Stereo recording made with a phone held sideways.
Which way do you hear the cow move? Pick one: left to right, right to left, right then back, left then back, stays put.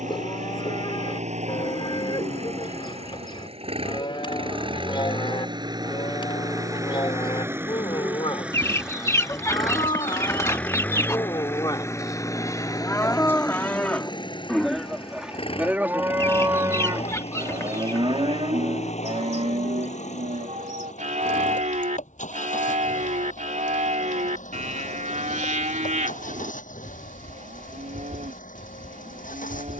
left to right.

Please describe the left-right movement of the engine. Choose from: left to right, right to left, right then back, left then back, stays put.
right to left.